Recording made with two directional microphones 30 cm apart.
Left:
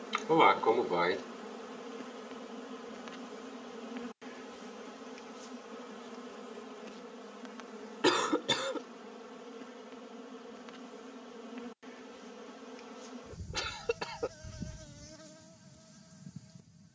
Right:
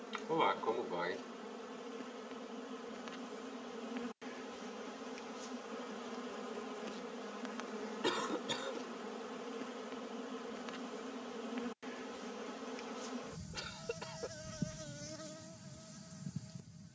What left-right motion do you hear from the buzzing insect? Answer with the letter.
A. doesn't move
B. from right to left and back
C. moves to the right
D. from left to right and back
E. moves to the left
C.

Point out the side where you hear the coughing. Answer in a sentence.
You can hear the coughing on the left.